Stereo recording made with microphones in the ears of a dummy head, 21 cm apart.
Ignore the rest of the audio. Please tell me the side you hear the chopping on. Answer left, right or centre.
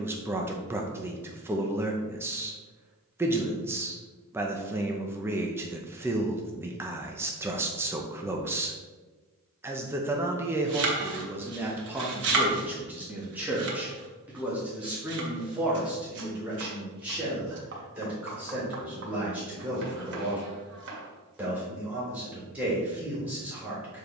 right.